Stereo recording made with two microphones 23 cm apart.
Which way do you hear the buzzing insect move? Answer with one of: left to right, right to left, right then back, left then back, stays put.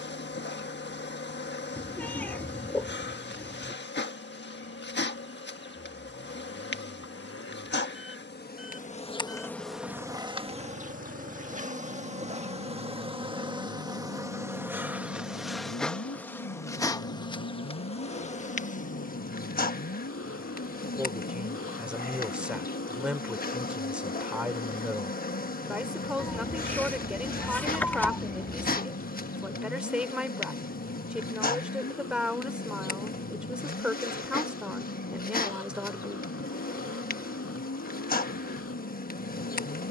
right then back.